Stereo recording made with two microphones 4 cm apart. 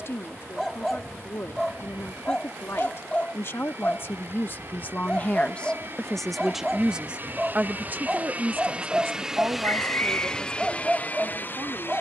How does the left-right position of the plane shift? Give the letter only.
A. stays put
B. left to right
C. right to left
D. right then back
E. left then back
C.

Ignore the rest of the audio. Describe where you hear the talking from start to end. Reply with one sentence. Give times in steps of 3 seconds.
In this clip you hear the talking on the left from 0 s and on the right from 6 s.